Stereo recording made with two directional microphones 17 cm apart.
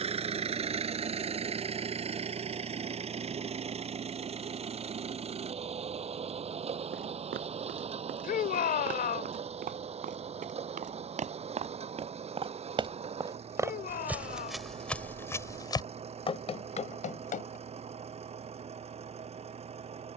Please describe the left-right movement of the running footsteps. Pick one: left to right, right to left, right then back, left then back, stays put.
right to left.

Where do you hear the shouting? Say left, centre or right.
left.